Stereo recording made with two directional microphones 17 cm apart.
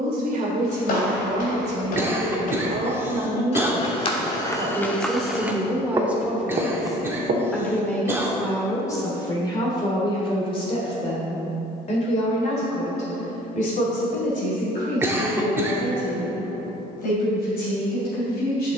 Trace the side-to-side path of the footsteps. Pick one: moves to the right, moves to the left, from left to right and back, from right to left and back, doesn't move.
moves to the right.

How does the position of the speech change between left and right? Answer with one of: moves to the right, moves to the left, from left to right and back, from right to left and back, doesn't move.
moves to the left.